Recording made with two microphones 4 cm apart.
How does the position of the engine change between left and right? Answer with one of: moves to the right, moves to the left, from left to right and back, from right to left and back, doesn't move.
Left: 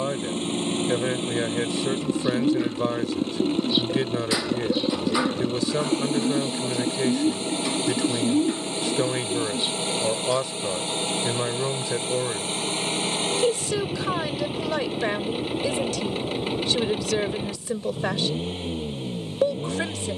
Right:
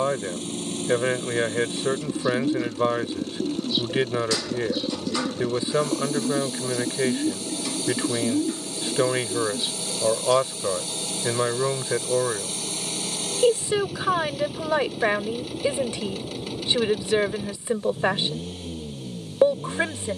doesn't move.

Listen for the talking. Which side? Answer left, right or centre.
right.